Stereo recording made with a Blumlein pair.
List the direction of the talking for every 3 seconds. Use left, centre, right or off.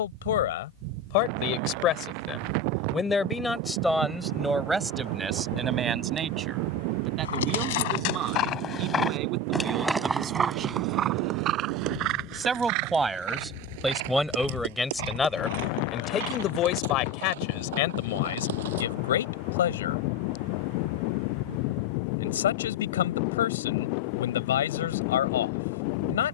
left, centre, right, right, centre, left, left, left, left.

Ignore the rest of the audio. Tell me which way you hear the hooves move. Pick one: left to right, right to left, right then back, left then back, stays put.
left to right.